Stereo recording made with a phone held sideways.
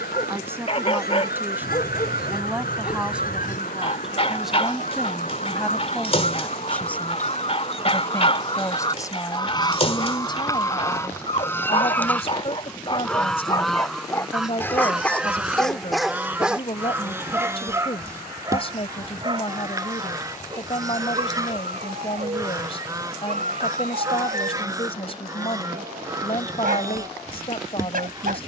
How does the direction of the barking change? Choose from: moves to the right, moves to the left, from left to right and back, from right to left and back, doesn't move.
moves to the right.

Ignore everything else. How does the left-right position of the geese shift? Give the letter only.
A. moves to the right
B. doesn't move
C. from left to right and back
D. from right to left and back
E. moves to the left
A.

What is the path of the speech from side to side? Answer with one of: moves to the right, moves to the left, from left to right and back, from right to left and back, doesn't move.
moves to the left.